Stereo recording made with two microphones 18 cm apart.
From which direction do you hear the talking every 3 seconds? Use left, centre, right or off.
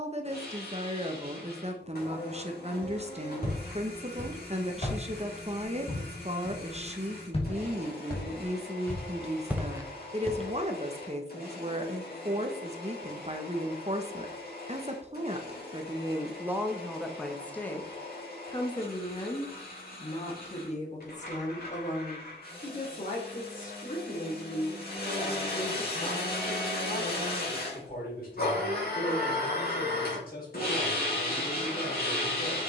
right, right, right, right, right, centre, left, left, left, left, left.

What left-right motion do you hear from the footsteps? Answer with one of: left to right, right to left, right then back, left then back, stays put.
left to right.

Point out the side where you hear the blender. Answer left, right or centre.
left.